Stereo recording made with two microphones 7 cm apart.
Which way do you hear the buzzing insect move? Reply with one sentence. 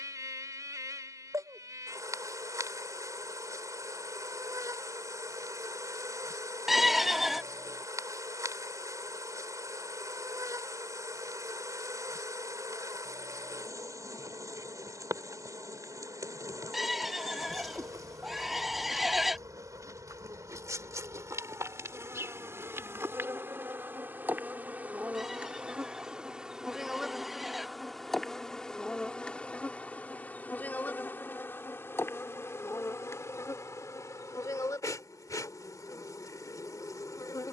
In this clip you hear the buzzing insect travel towards the left.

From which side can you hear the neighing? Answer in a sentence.
You can hear the neighing in the centre.